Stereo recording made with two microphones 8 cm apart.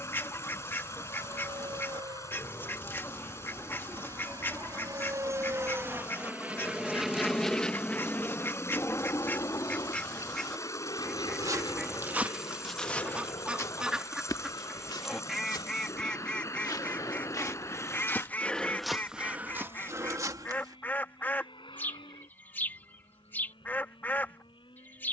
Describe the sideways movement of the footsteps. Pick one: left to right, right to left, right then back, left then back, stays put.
left then back.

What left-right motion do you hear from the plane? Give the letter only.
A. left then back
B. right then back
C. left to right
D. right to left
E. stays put
D.